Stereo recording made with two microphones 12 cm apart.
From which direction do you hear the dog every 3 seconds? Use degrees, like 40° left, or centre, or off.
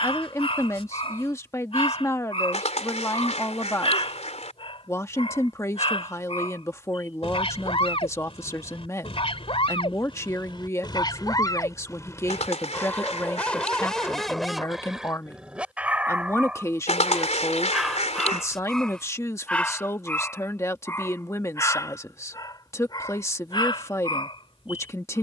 50° left, 50° left, 50° left, 40° left, 10° left, 10° right, 10° left, 30° left, 40° left.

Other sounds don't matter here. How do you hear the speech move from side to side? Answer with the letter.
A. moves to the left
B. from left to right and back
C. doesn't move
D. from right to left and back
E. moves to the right
C.